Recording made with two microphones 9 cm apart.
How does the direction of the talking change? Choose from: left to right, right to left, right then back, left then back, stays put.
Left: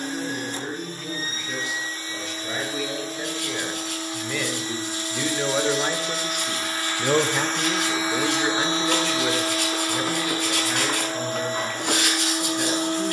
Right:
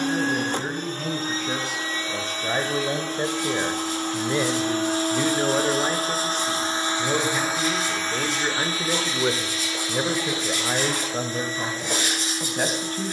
left then back.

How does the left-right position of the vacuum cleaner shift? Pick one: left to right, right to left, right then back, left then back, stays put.
right to left.